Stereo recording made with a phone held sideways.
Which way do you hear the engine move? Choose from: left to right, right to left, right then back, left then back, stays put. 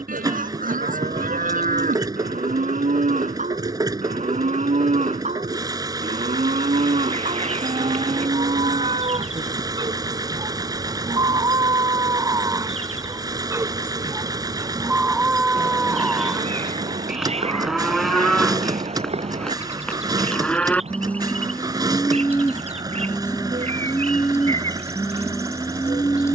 stays put.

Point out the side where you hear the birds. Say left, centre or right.
right.